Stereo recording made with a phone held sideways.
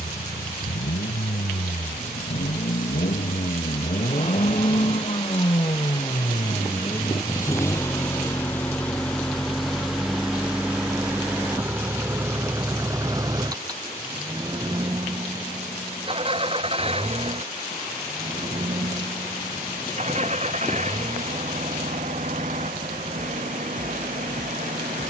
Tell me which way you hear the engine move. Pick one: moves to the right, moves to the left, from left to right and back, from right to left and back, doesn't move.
moves to the right.